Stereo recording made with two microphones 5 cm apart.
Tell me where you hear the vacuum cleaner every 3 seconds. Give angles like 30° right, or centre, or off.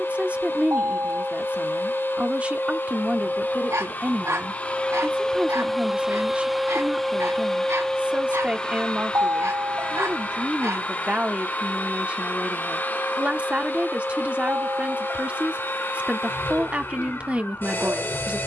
50° left, 20° left, 10° left, 30° left, 40° left, 40° left.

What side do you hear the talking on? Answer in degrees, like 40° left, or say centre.
20° right.